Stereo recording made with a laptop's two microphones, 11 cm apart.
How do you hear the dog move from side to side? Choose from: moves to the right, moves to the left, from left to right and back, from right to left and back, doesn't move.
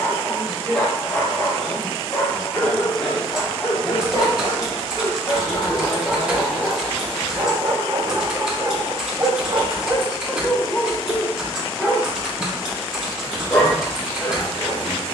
from left to right and back.